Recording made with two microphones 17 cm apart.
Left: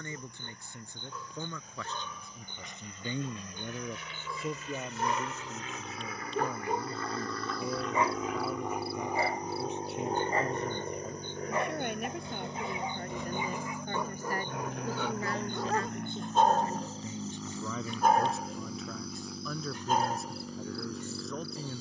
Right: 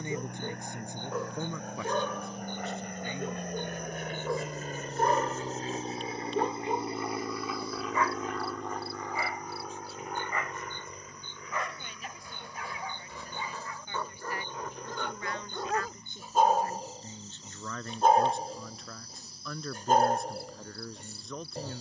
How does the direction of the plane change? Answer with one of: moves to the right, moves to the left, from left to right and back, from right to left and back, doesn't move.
moves to the left.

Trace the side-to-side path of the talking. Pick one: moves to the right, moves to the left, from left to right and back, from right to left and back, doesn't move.
from right to left and back.